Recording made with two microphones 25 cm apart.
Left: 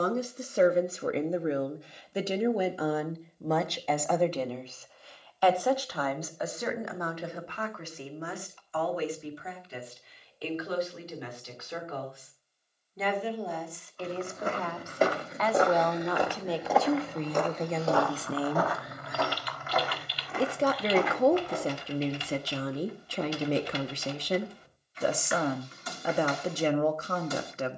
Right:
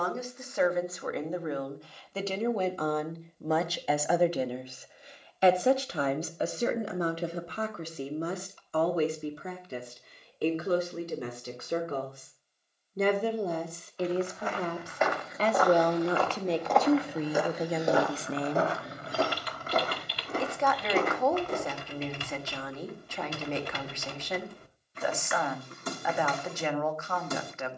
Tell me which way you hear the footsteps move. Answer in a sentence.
In this clip you hear the footsteps go from the left side to the right.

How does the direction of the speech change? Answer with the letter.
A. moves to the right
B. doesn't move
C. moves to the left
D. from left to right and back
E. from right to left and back
D.